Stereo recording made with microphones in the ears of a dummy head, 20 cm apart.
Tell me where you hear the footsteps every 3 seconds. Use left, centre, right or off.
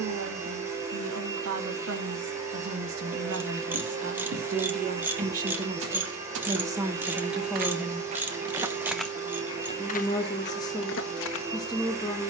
off, right, right, left.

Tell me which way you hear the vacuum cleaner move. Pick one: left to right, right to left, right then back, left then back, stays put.
stays put.